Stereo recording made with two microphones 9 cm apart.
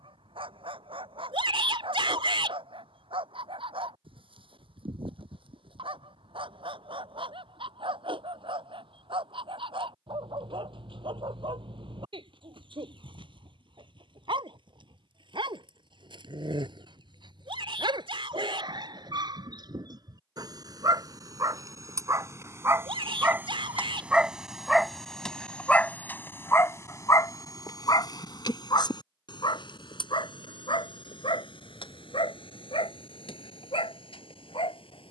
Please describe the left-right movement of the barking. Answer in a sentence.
In this clip you hear the barking go from the right side to the left.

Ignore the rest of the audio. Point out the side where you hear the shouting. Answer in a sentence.
In this clip you hear the shouting on the right.